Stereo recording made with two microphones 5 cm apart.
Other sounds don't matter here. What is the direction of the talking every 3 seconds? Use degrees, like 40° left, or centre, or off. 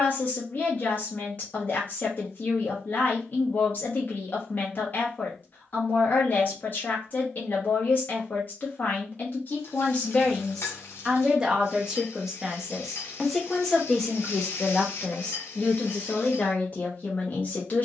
40° left, 40° left, 40° left, 10° left, centre, 30° left.